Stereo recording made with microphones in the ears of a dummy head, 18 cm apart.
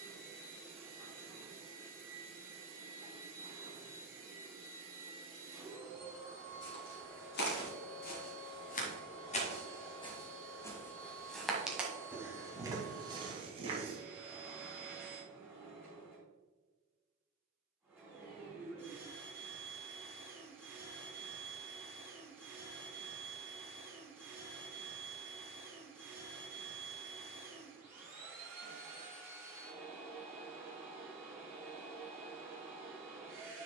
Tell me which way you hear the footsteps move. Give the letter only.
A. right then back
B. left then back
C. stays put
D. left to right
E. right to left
D.